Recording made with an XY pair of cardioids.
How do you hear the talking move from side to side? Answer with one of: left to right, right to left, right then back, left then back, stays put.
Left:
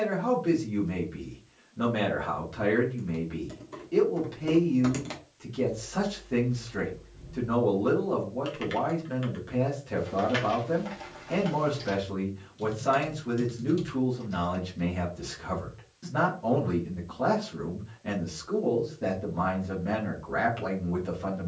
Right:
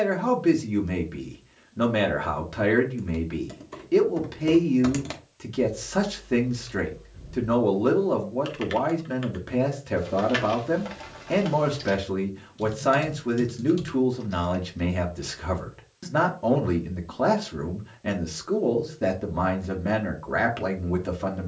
stays put.